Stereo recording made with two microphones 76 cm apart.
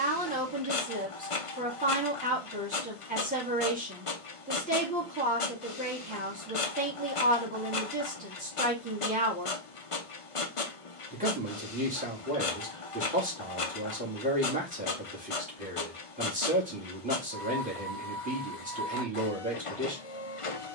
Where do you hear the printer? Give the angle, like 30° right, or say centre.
40° left.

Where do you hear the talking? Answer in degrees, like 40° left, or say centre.
10° right.